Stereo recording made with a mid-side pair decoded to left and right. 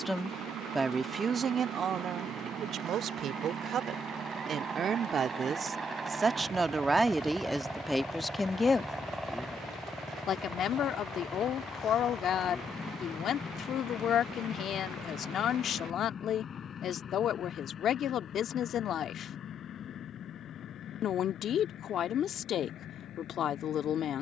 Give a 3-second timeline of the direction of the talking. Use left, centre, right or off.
right, right, centre, left, left, left, left, left.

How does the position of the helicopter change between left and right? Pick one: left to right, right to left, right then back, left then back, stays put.
right to left.